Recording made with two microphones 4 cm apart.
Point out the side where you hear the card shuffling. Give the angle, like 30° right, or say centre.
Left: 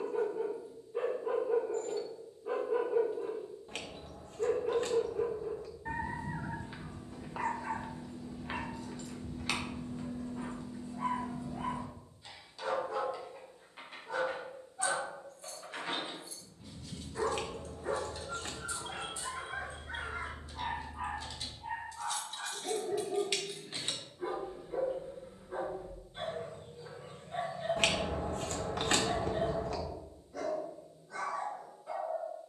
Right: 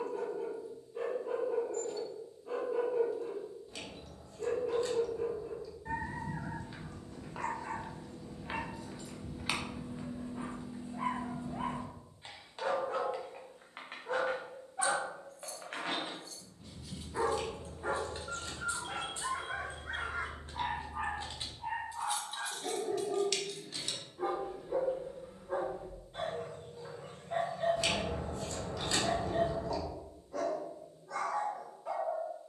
50° left.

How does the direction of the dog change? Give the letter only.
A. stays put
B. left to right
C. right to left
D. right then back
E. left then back
B.